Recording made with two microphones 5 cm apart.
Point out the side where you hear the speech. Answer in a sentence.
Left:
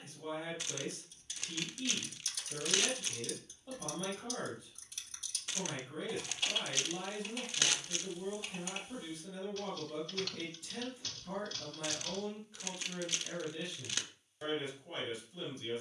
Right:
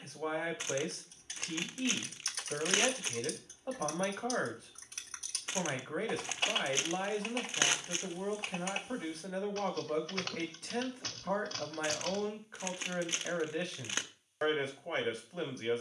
You can hear the speech on the right.